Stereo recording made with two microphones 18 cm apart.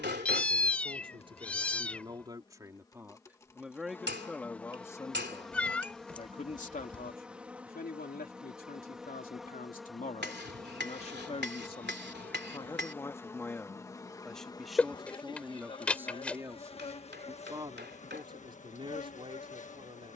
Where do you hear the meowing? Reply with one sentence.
In this clip you hear the meowing in the centre.